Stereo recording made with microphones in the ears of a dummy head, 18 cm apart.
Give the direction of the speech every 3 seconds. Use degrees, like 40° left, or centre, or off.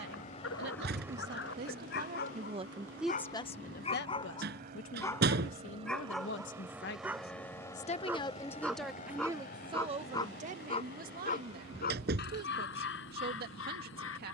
50° right, 60° left, 40° left, 40° right, 50° right.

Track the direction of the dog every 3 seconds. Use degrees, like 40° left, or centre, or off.
60° left, 20° left, 10° right, 30° left, 60° left.